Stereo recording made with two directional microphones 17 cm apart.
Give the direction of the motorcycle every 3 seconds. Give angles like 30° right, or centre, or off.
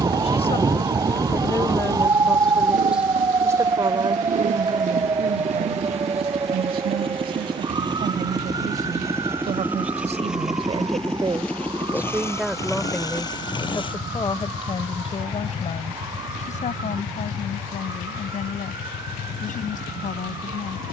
50° right, 50° right, 30° right, centre, 20° left, 40° left, 60° left.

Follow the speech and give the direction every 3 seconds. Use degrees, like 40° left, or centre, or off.
20° left, 30° right, 60° right, 30° right, 10° left, 40° left, 50° left.